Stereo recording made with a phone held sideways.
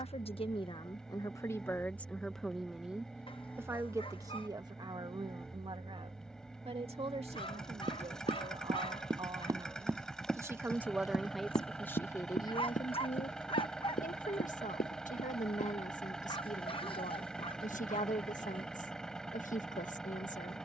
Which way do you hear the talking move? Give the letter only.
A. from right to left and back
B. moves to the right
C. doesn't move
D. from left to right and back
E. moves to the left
D.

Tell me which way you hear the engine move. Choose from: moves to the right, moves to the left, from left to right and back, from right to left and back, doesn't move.
doesn't move.